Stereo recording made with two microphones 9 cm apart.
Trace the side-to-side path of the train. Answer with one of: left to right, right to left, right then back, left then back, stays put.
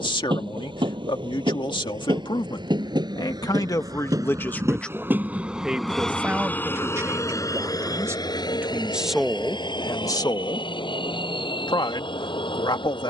right to left.